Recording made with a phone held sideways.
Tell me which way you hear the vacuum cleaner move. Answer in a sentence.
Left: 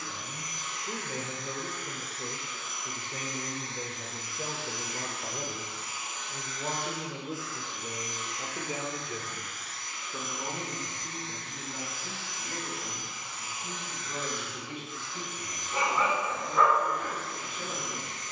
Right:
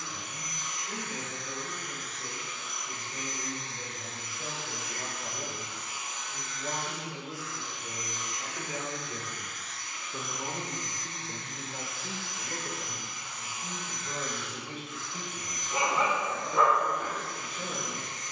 In this clip you hear the vacuum cleaner stay in one place.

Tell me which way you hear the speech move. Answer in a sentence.
In this clip you hear the speech travel towards the right.